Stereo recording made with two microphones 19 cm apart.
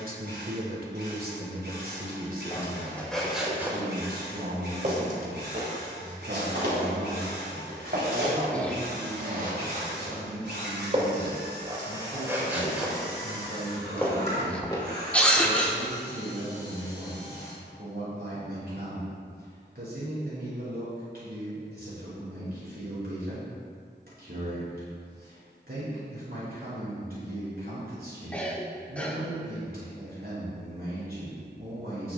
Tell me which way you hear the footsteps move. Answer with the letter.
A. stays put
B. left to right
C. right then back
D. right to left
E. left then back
C.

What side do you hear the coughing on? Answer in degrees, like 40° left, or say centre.
10° left.